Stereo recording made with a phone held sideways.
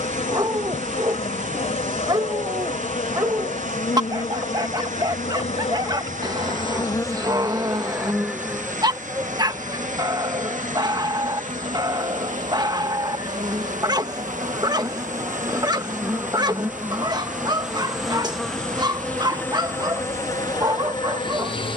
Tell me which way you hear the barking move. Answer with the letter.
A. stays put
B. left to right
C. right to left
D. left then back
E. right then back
A.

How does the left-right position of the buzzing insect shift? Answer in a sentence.
In this clip you hear the buzzing insect go right and come back.